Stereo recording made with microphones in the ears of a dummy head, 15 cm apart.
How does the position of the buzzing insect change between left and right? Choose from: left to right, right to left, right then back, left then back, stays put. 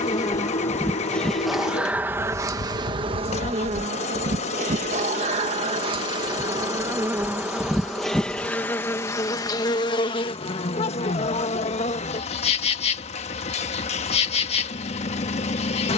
right then back.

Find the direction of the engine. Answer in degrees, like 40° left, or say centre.
40° left.